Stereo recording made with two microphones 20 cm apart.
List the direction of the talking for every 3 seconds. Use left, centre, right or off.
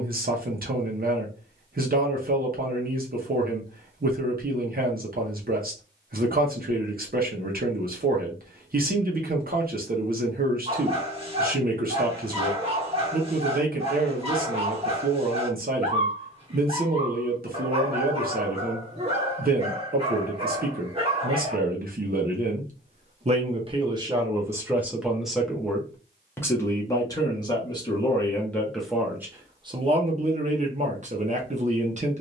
right, right, right, right, right, right, right, right, centre, centre, right.